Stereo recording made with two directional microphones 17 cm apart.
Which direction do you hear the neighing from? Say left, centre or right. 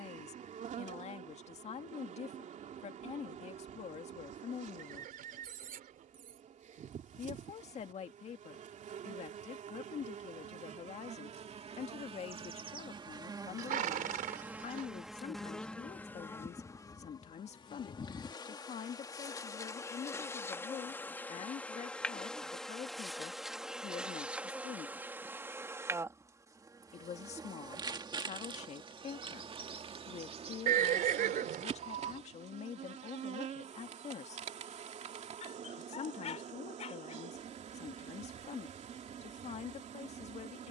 right.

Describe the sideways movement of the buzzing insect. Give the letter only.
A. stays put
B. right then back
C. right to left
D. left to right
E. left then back
E.